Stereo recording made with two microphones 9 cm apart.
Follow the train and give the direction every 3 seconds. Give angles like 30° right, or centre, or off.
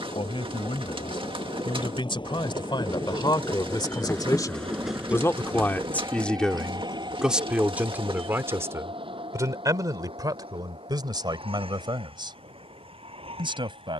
70° left, 10° left, 50° right, 70° right, 70° right.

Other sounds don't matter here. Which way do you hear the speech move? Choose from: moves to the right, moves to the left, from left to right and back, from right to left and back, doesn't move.
moves to the right.